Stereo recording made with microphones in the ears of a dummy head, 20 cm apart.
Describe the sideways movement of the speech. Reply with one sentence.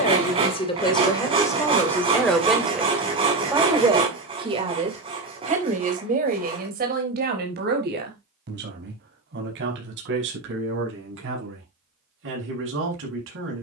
In this clip you hear the speech go from the left side to the right.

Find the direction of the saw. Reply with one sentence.
You can hear the saw on the right.